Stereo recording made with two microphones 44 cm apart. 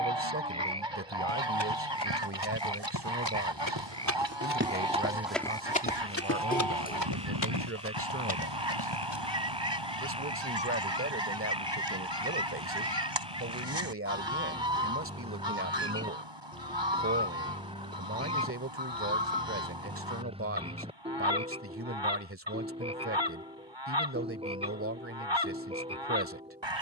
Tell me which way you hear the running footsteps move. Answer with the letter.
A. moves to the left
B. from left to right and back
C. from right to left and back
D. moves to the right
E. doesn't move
A.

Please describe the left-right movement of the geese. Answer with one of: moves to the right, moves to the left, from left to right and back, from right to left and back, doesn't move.
doesn't move.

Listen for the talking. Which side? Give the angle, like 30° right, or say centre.
30° right.